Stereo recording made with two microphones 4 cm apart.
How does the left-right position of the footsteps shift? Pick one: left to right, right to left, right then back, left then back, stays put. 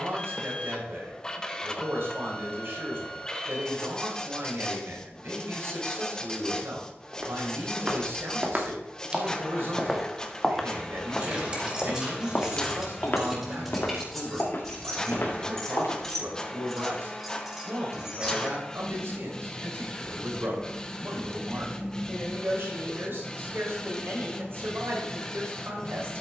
right to left.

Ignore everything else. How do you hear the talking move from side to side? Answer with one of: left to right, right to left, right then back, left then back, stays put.
stays put.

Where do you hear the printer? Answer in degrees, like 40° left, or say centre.
20° left.